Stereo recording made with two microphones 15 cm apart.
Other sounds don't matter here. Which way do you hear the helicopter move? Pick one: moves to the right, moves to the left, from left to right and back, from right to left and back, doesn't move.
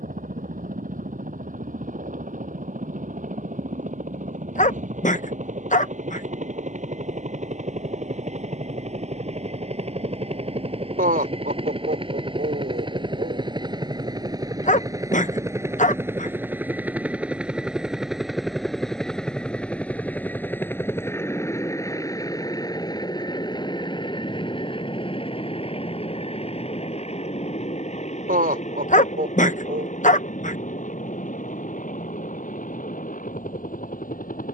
moves to the left.